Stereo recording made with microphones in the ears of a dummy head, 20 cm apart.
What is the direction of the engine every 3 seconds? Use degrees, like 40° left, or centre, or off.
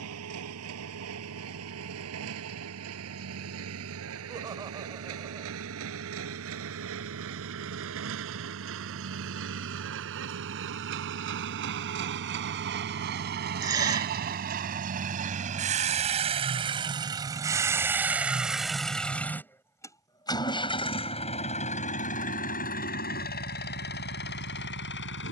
70° right, 70° right, 70° right, 60° right, 50° right, 20° right, 10° left, 40° left, 50° left.